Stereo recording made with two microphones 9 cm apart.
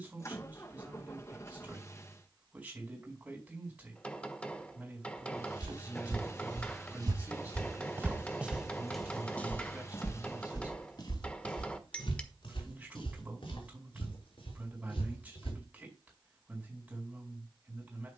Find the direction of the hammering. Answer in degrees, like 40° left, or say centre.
10° left.